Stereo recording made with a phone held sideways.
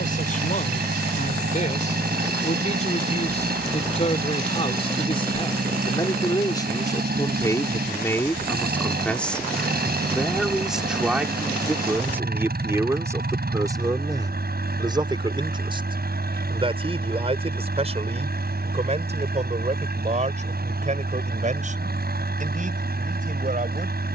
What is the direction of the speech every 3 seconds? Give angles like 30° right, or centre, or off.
50° left, 40° left, 20° left, centre, 20° right, 30° right, 40° right, 50° right.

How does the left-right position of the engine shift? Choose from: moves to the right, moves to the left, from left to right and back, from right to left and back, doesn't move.
doesn't move.